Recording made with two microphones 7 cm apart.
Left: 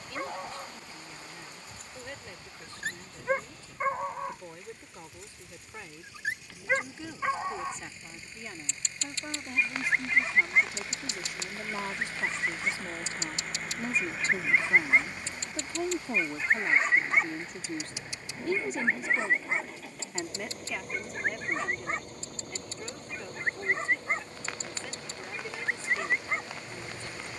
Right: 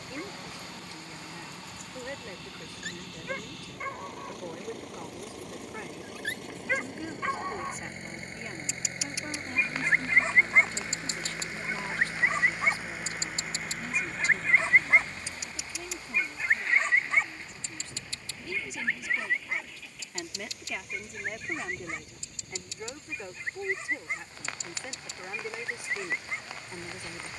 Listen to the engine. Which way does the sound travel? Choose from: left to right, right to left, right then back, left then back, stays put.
right to left.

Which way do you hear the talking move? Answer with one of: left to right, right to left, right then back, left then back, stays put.
left then back.